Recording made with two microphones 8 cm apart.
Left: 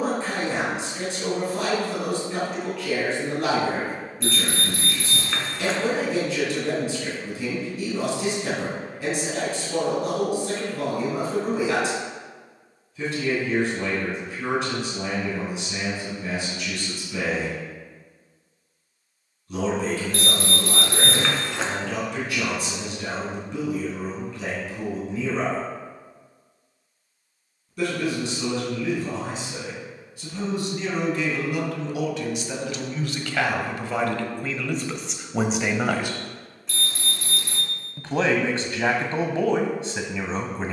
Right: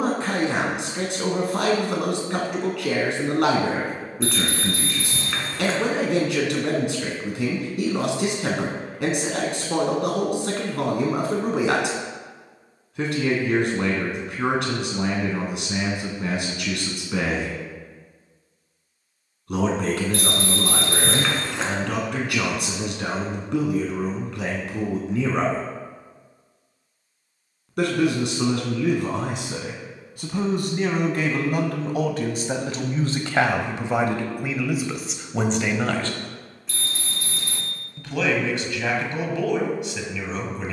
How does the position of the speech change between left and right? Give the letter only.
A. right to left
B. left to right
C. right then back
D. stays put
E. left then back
A.